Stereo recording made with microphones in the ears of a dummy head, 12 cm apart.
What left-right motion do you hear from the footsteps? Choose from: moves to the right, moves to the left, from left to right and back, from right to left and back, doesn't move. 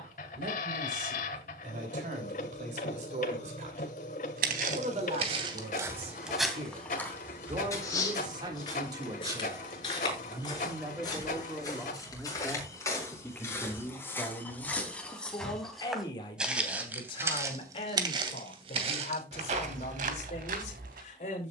from right to left and back.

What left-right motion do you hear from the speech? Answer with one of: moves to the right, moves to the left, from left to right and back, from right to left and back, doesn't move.
moves to the left.